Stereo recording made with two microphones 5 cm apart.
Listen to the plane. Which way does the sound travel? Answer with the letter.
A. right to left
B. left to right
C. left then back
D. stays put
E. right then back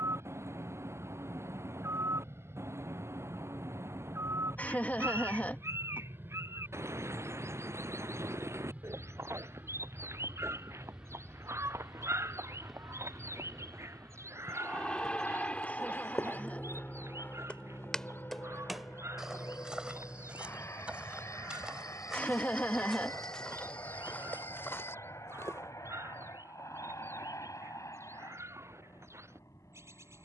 A.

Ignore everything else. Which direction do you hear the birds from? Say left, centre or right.
right.